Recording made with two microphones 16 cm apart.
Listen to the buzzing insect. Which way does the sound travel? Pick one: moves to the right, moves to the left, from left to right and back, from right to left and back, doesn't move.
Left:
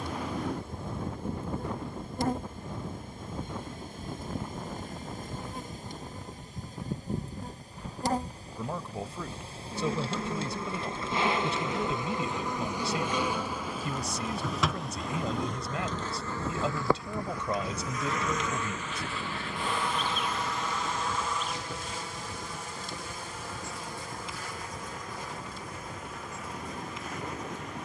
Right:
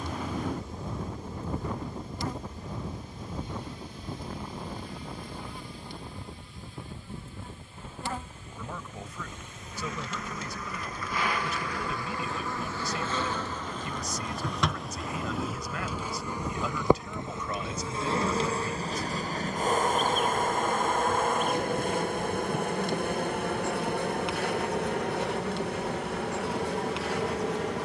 moves to the right.